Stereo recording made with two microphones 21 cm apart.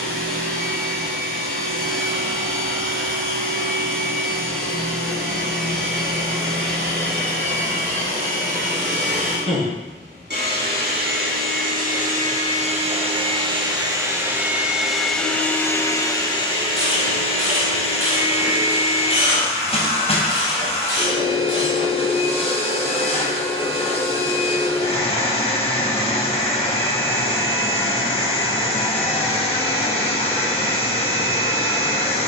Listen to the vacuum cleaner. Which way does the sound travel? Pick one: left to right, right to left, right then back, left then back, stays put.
right to left.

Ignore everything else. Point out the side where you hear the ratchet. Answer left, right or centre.
right.